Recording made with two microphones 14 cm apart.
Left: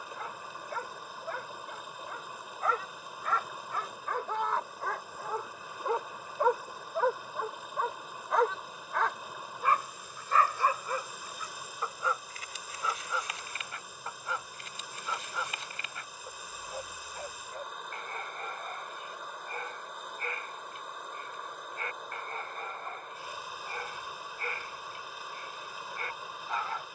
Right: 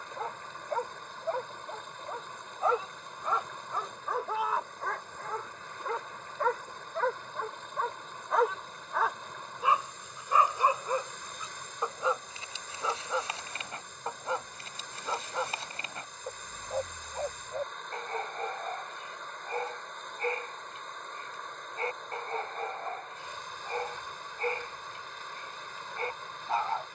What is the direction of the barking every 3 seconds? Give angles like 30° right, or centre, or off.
30° right, centre, 10° left, 20° right, 30° right, 30° right, 30° right, 30° right, 30° right.